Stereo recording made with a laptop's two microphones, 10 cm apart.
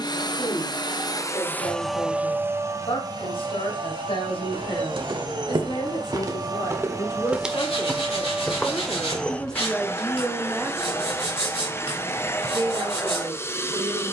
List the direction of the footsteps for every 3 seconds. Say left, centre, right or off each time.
off, right, centre, left, off.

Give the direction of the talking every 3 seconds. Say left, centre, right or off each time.
left, left, left, centre, right.